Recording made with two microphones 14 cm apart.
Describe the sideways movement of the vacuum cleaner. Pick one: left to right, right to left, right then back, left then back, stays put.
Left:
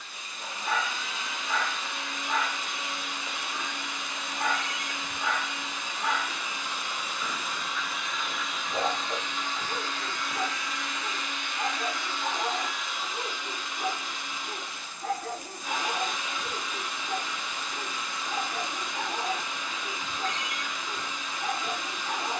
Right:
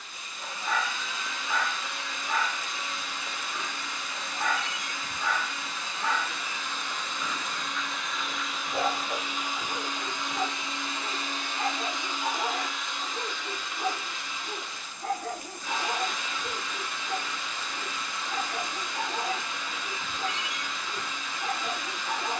right then back.